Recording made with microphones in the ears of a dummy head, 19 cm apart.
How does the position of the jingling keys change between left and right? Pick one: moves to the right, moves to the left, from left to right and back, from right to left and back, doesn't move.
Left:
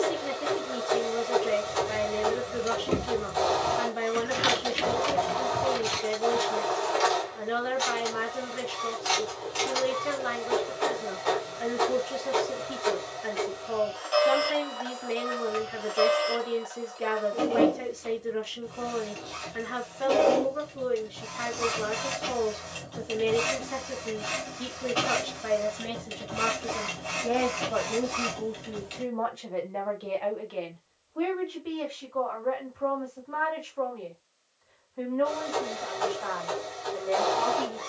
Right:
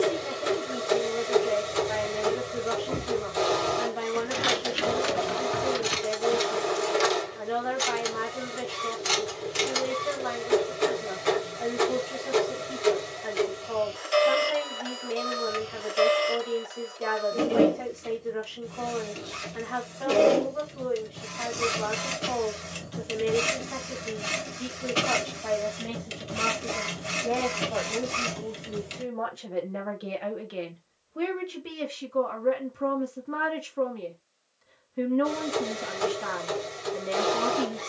moves to the right.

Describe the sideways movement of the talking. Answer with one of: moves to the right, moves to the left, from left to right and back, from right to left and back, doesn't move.
moves to the right.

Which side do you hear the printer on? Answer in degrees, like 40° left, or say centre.
30° right.